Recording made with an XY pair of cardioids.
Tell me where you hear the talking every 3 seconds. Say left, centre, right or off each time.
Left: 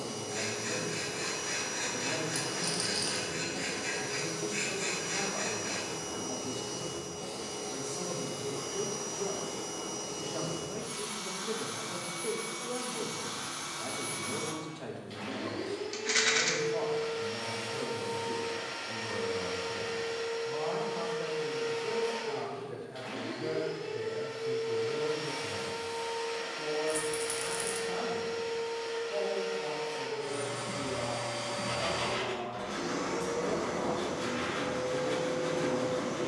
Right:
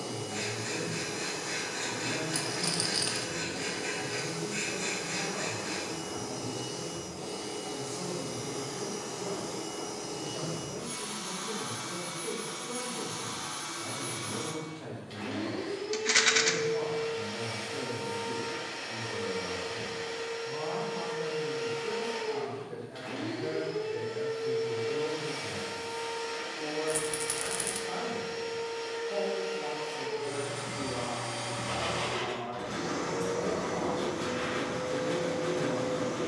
left, left, left, left, left, left, left, centre, right, right, right, right.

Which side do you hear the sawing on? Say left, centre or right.
centre.